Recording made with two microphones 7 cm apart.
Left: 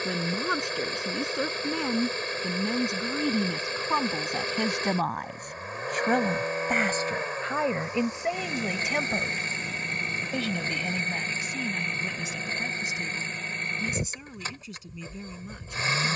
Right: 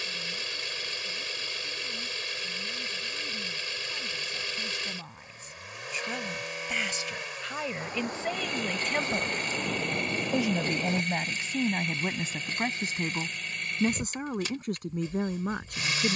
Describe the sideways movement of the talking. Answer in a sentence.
In this clip you hear the talking move from left to right.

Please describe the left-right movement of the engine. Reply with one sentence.
You can hear the engine stay in one place.